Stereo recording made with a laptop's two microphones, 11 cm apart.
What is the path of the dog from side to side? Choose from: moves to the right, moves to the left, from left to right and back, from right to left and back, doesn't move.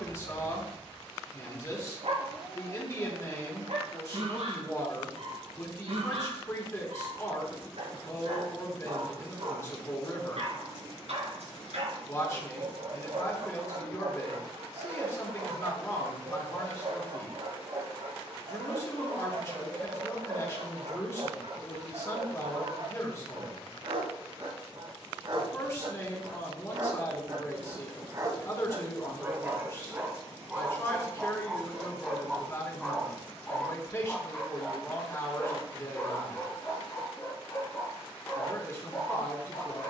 moves to the left.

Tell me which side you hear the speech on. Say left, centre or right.
left.